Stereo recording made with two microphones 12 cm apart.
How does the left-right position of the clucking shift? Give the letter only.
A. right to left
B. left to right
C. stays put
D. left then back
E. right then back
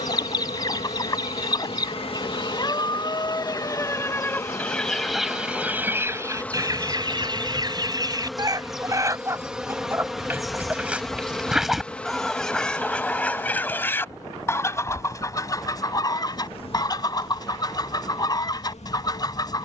E.